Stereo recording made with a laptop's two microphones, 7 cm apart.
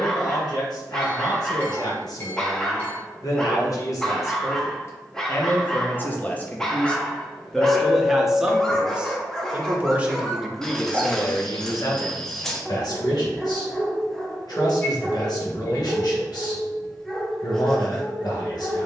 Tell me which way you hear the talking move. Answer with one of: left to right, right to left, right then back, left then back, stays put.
right then back.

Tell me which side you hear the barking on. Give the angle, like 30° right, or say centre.
10° left.